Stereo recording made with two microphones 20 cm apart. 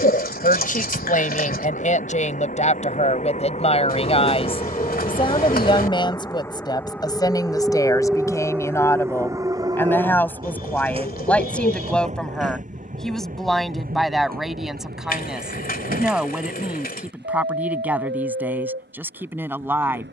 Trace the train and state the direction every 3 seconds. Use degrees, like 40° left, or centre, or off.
50° left, 30° left, centre, 20° right, 40° right, 50° right, 60° right.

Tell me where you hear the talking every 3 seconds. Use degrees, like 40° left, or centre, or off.
40° left, 30° left, 20° left, 10° left, centre, 10° right, 10° right.